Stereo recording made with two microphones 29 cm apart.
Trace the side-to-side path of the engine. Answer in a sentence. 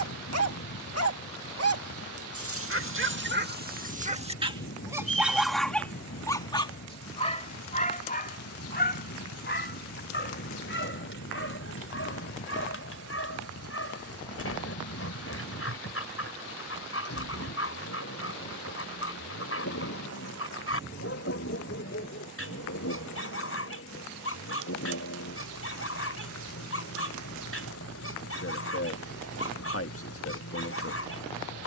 In this clip you hear the engine stay put.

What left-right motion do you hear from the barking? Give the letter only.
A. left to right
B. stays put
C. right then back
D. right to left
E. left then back
D.